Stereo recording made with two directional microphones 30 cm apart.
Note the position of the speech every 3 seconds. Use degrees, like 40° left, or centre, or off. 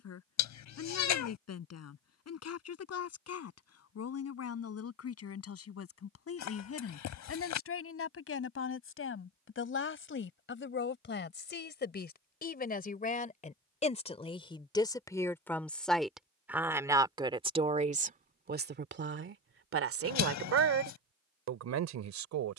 60° left, 50° left, 50° left, 40° left, 20° left, 10° right, 40° right, 60° right.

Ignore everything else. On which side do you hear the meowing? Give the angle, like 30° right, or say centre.
70° left.